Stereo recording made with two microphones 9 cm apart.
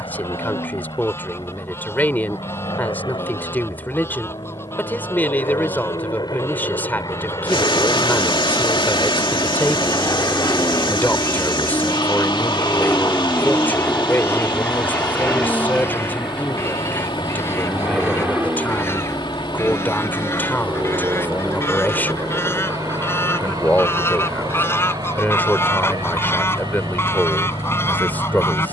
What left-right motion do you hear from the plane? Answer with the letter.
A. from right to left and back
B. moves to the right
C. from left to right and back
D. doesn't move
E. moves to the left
B.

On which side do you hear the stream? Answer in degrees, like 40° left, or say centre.
70° left.